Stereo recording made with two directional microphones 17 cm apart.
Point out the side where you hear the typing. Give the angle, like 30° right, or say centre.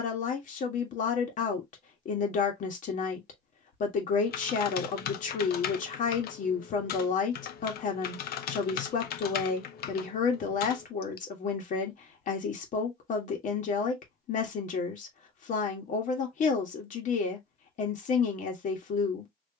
60° left.